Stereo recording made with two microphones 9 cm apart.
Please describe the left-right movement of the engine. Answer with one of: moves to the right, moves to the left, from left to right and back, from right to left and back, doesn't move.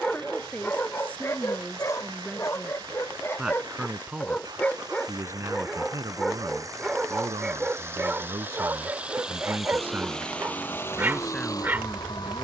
moves to the left.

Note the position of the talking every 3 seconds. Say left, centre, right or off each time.
centre, right, right, centre.